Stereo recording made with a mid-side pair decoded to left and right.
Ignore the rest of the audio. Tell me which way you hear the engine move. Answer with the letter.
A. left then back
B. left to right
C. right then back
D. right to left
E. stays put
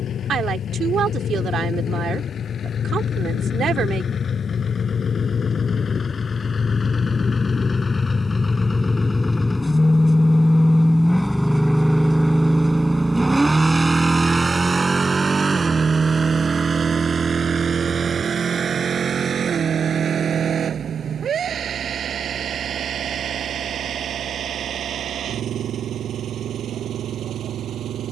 B.